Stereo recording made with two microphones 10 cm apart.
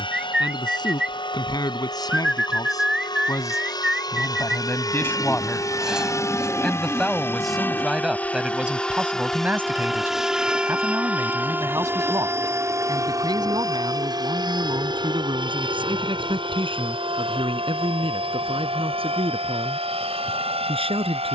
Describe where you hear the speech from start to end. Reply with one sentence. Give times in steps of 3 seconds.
You can hear the speech on the left from 0 s, in the centre from 6 s and on the right from 9 s.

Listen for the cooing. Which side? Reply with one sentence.
You can hear the cooing in the centre.